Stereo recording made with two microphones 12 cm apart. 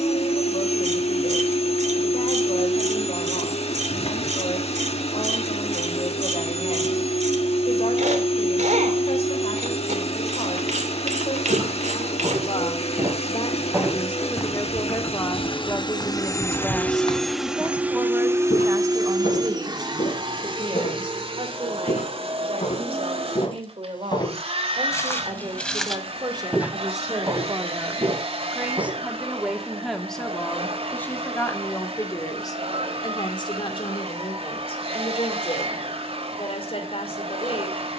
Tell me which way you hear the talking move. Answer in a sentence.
In this clip you hear the talking move from left to right and back again.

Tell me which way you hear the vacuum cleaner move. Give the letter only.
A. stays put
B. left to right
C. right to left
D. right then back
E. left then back
B.